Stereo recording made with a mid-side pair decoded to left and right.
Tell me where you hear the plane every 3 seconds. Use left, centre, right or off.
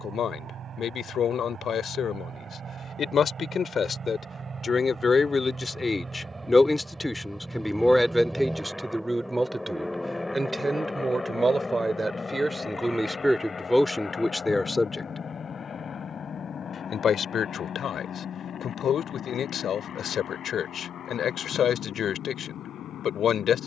right, right, centre, centre, left, left, left, left.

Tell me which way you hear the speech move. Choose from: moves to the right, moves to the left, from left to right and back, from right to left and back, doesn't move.
from left to right and back.